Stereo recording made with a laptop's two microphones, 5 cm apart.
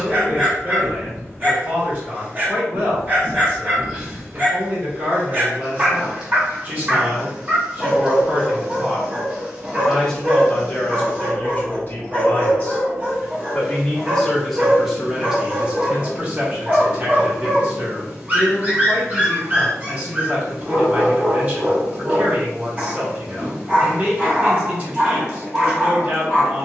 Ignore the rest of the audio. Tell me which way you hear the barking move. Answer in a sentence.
In this clip you hear the barking stay in one place.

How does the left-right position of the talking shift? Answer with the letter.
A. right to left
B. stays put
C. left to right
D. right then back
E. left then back
E.